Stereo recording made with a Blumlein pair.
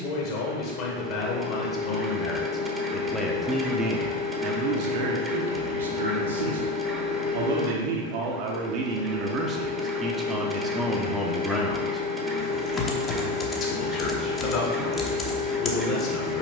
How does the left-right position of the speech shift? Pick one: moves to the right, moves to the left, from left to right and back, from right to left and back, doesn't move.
from left to right and back.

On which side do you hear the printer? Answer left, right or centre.
centre.